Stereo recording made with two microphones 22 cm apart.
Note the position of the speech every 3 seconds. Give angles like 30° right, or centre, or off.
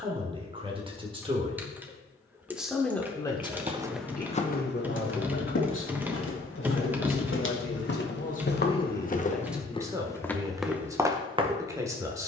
20° right, 40° left, 50° left, 10° right.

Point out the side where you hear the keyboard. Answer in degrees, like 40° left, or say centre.
10° right.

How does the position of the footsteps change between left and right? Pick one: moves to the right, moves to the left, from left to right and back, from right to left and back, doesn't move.
from right to left and back.